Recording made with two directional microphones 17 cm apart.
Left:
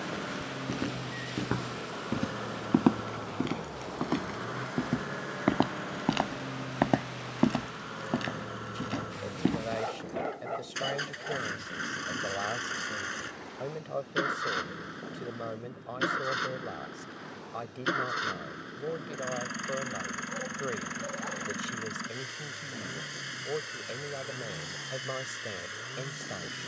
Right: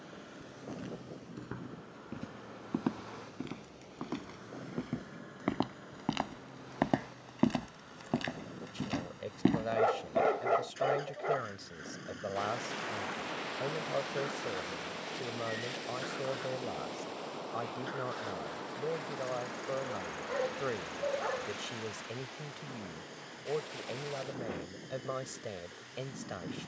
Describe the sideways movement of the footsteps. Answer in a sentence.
You can hear the footsteps move from left to right.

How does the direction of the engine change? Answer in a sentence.
In this clip you hear the engine stay in one place.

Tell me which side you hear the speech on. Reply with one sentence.
You can hear the speech in the centre.